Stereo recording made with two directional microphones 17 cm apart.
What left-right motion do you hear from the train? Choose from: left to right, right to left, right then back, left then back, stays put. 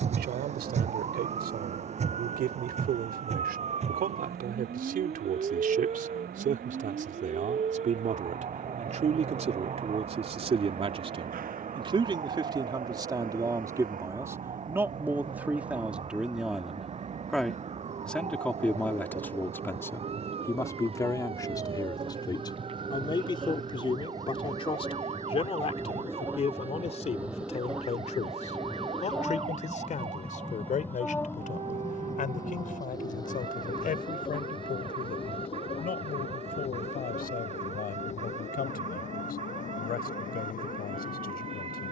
right to left.